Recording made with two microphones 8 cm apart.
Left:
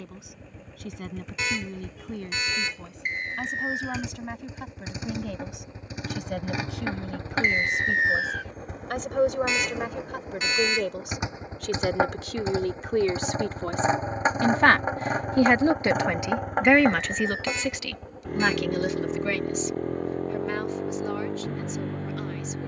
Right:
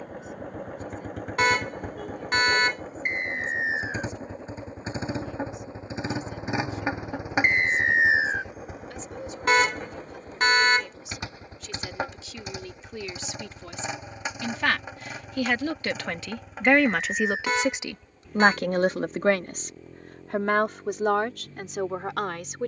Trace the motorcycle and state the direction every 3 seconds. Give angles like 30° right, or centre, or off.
50° right, 40° right, 10° right, 10° left, 30° left, 50° left, 60° left, 60° left.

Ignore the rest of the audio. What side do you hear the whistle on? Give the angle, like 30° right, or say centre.
20° right.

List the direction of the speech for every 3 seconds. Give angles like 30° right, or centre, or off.
80° left, 70° left, 70° left, 60° left, 50° left, centre, 50° right, 70° right.